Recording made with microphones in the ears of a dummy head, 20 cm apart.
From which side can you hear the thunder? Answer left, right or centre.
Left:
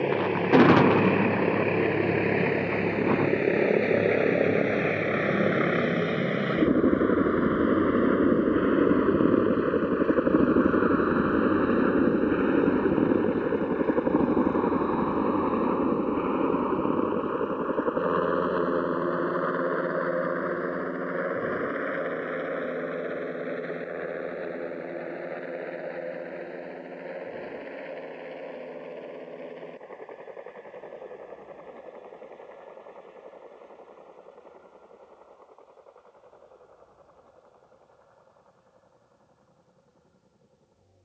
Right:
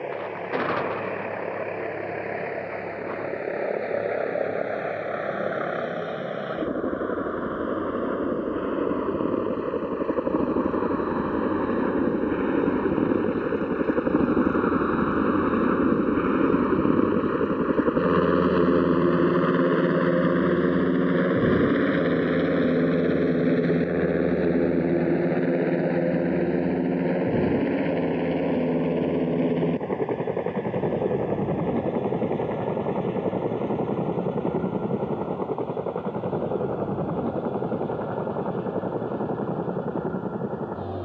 left.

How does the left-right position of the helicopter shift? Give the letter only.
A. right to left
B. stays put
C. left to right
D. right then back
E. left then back
C.